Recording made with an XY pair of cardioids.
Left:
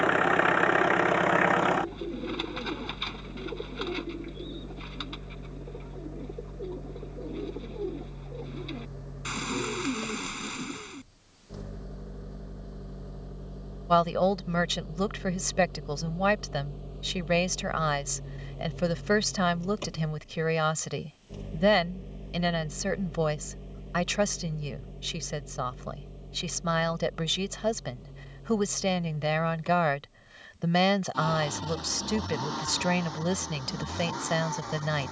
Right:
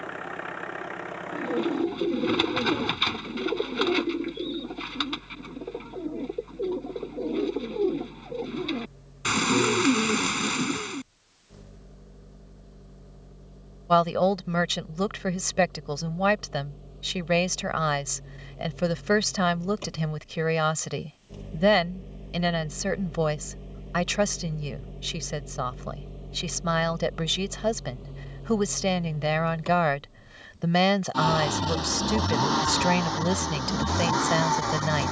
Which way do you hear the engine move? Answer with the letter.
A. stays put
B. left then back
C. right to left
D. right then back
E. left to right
E.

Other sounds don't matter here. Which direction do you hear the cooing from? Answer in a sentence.
In this clip you hear the cooing on the right.